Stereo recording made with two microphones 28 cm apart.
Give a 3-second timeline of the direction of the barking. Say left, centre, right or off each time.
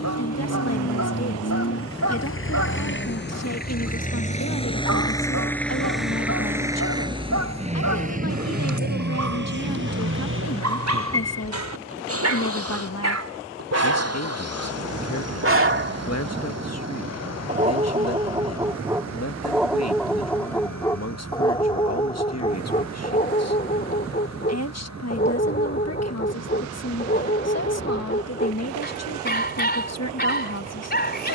right, right, right, right, right, right, centre, left, left, left, left.